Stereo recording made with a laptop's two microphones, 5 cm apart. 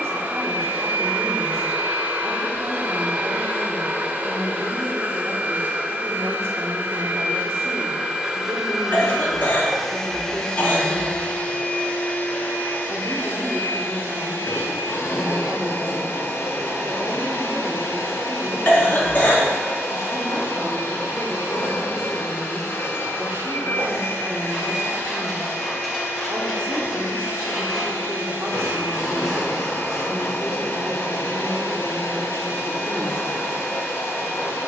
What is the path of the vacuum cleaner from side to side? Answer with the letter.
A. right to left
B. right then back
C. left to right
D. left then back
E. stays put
A.